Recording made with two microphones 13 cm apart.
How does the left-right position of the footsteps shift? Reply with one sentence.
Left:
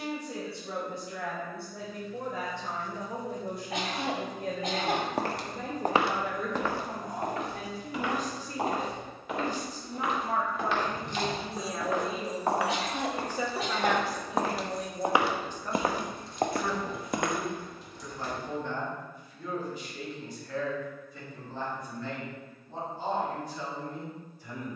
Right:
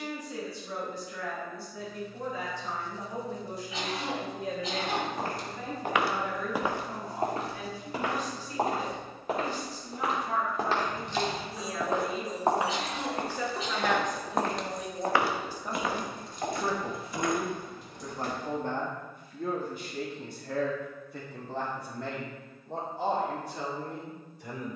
You can hear the footsteps move from left to right and back again.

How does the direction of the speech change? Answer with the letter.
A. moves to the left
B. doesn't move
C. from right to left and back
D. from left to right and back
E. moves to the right
E.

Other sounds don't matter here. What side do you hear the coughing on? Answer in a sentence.
You can hear the coughing on the left.